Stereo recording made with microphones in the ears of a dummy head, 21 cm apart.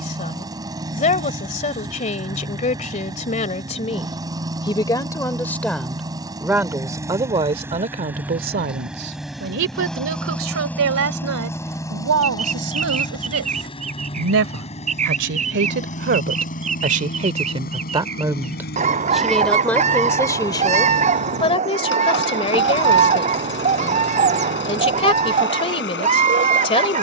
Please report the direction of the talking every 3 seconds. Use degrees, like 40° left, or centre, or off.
30° left, 20° left, 30° right, 60° right, 60° right, 40° right, centre, 20° left, 20° left.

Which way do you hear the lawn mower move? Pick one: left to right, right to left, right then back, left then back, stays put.
right to left.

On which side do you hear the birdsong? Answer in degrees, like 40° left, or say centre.
30° right.